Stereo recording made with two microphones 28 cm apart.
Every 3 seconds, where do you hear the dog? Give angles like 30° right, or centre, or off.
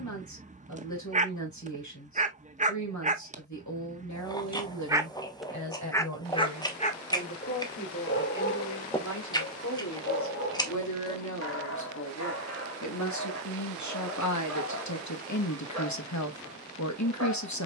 30° right, 20° right, 30° left, 60° left, 60° left, 70° left.